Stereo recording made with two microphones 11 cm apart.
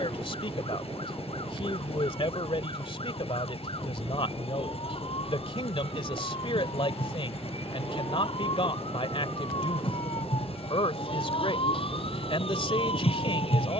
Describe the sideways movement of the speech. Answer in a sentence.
You can hear the speech stay put.